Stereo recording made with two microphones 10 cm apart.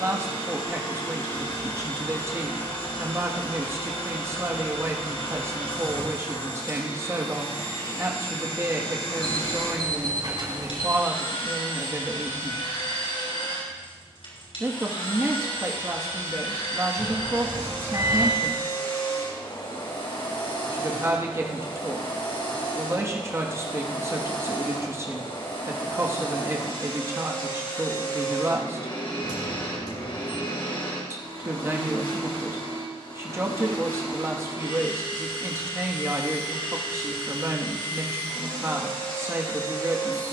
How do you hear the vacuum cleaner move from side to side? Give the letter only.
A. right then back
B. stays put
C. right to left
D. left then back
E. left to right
B.